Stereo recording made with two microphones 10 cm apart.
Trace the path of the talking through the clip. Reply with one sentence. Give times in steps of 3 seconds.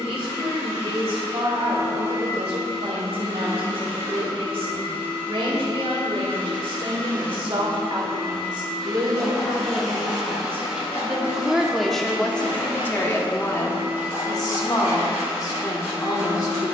You can hear the talking on the right from 0 s and on the left from 12 s.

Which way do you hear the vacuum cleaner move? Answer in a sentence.
You can hear the vacuum cleaner travel towards the right.